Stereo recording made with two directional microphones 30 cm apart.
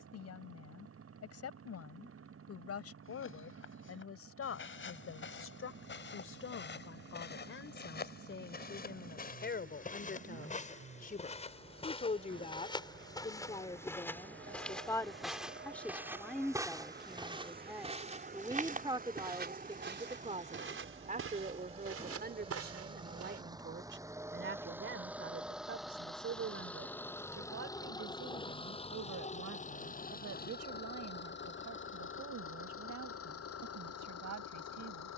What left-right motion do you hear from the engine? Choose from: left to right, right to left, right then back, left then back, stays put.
right to left.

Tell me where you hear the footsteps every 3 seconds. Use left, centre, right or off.
off, left, left, left, centre, centre, right, right, off, off, off, off.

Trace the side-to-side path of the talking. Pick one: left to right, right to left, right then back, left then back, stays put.
left to right.